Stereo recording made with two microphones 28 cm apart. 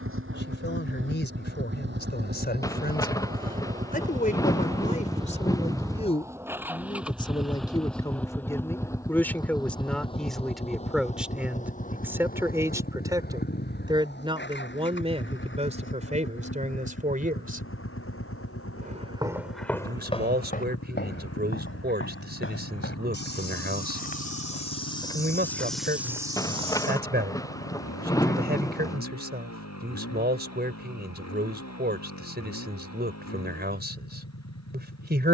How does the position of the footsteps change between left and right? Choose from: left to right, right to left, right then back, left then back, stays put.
left then back.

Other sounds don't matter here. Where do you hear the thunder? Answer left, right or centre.
centre.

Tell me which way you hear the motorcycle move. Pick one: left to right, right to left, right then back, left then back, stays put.
right to left.